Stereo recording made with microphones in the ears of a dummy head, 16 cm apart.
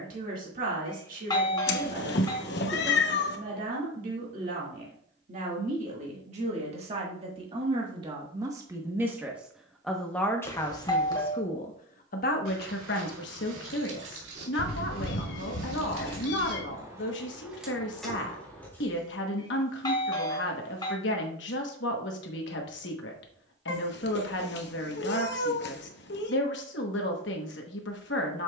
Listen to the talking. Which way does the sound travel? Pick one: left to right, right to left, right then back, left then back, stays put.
right to left.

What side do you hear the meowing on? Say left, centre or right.
left.